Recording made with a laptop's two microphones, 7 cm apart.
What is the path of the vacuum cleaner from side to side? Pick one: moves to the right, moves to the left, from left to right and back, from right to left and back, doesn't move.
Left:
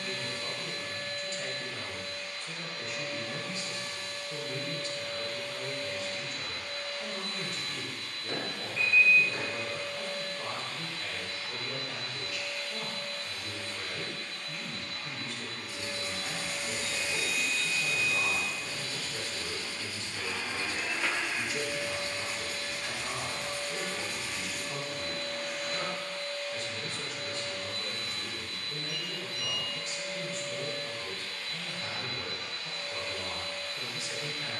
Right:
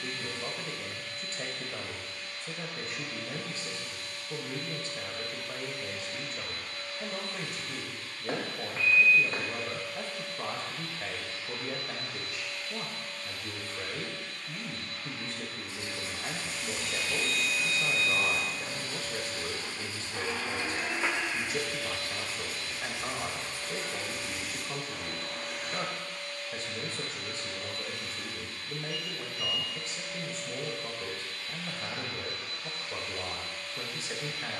from left to right and back.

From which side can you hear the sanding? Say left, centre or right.
right.